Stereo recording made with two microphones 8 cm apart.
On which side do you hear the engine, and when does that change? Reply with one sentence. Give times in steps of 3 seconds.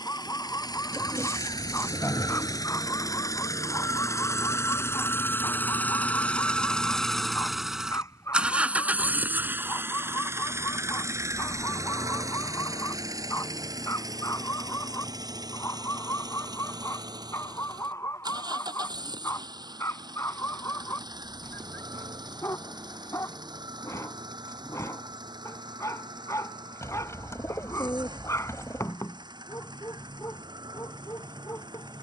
You can hear the engine on the left from 0 s, in the centre from 6 s and on the right from 9 s.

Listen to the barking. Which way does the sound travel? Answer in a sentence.
In this clip you hear the barking stay in one place.